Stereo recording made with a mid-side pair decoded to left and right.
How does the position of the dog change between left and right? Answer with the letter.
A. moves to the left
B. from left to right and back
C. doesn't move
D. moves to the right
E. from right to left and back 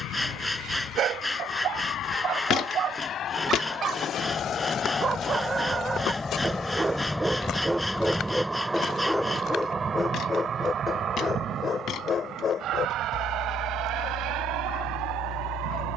A.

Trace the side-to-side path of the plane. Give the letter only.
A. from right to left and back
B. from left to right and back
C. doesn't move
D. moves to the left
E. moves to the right
E.